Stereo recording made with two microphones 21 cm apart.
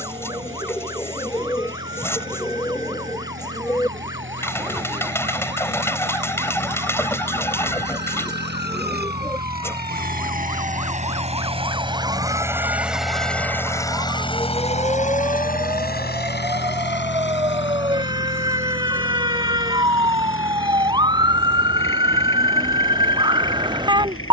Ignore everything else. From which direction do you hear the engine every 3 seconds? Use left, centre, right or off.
right, right, right, right, centre, left, left, left.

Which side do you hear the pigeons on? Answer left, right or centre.
centre.